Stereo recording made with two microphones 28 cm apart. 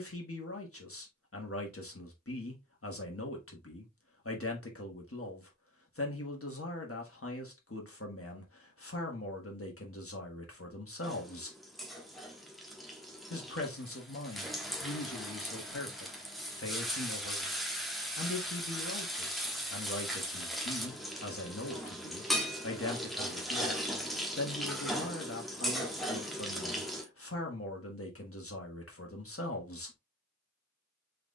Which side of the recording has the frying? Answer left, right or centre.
centre.